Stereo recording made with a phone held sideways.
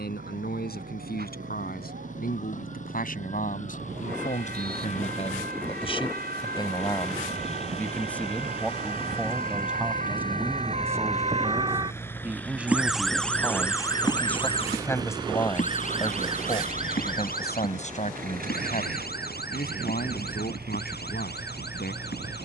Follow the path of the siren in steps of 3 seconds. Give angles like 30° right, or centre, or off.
80° right, 70° right, 70° right, 50° right, 20° left, 60° left, 70° left, 80° left.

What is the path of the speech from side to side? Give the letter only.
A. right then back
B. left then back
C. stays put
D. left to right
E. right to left
A.